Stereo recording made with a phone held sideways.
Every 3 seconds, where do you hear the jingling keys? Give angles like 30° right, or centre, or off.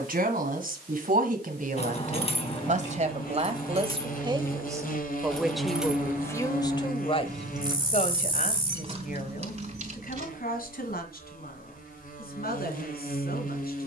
40° left, 20° left, 30° right, 50° right, off.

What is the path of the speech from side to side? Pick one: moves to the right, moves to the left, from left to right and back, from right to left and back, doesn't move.
moves to the left.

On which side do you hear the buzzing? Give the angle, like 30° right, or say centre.
60° left.